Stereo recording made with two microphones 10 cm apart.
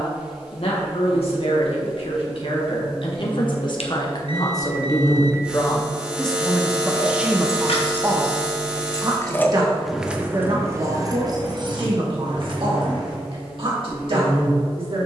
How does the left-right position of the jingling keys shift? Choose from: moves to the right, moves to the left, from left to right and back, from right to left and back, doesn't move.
moves to the right.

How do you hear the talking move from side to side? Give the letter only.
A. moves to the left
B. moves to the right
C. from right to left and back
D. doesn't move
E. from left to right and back
B.